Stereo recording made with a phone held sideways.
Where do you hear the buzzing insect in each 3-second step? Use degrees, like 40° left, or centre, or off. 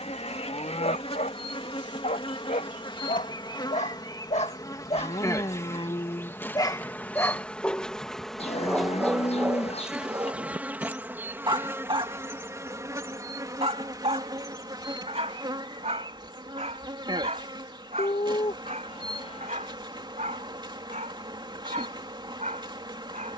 40° left, 30° left, 10° left, 10° right, 30° right, 30° right, 40° right, 40° right.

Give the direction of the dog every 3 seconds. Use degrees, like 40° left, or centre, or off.
70° left, 50° left, 20° left, 20° right, 50° right, 60° right, 60° right, 60° right.